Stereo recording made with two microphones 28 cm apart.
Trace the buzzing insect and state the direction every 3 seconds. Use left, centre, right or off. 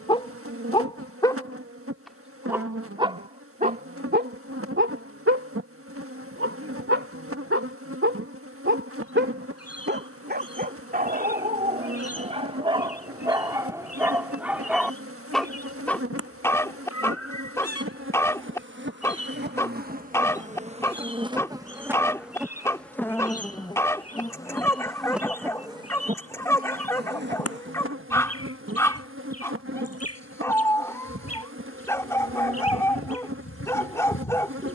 right, right, right, right, right, right, right, centre, centre, right, right, right.